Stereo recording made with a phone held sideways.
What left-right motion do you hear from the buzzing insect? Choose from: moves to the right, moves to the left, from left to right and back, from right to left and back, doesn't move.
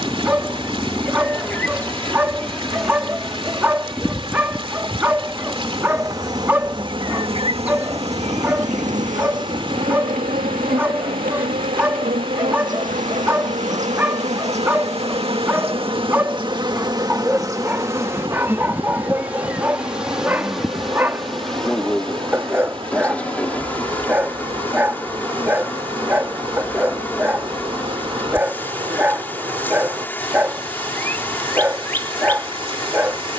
from left to right and back.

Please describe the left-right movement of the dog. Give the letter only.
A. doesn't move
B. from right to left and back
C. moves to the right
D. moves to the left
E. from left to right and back
A.